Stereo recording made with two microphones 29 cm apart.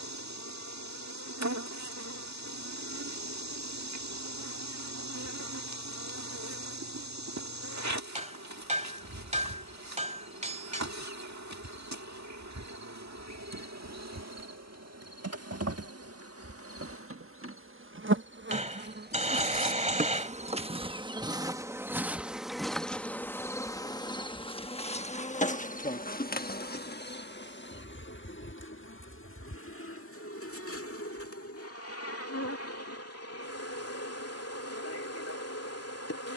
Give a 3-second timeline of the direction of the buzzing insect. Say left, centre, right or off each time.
right, right, right, right, right, right, right, centre, left, left, left, left.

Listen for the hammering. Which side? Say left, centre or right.
right.